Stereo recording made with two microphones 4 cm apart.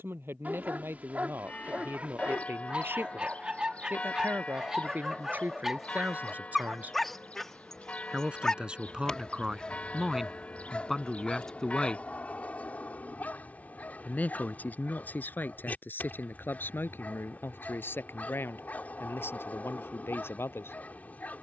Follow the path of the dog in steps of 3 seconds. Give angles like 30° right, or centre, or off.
40° right, 20° right, 10° left, 30° left, 40° left, 40° left, 40° left.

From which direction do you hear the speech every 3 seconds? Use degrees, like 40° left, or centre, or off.
60° right, 50° right, 30° right, centre, 40° left, 50° left, 60° left.